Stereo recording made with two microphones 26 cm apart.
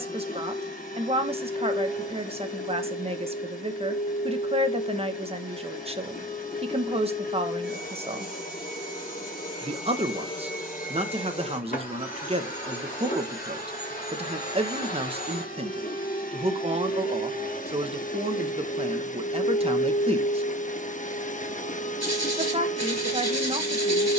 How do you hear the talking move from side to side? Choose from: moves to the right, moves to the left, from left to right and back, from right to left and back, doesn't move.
doesn't move.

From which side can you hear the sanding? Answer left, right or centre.
right.